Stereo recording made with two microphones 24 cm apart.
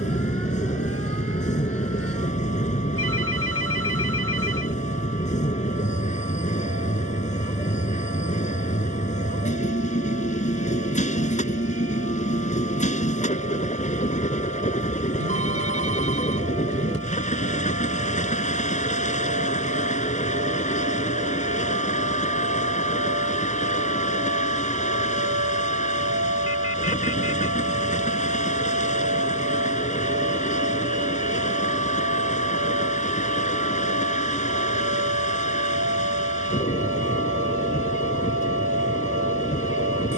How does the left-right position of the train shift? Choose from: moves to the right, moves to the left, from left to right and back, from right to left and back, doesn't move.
doesn't move.